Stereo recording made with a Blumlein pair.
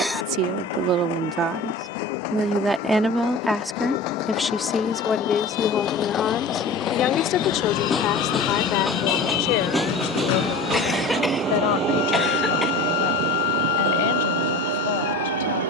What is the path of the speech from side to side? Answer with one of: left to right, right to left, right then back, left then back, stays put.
right to left.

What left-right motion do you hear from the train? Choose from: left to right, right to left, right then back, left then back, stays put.
left to right.